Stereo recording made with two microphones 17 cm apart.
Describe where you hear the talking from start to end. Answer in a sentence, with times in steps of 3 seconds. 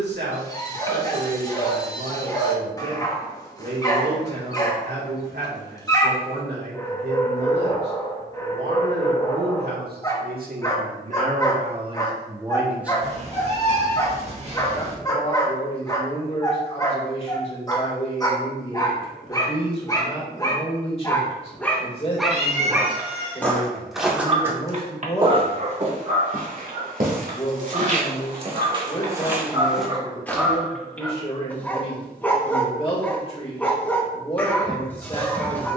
You can hear the talking on the right from 0 s, in the centre from 12 s and on the left from 15 s.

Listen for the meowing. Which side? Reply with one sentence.
You can hear the meowing on the right.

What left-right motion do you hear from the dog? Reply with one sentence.
In this clip you hear the dog go right and come back.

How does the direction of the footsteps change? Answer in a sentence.
In this clip you hear the footsteps move from left to right and back again.